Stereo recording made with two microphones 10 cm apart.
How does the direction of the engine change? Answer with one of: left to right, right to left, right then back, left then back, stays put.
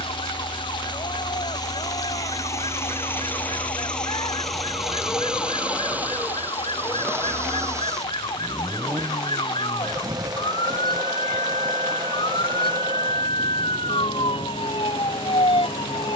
left to right.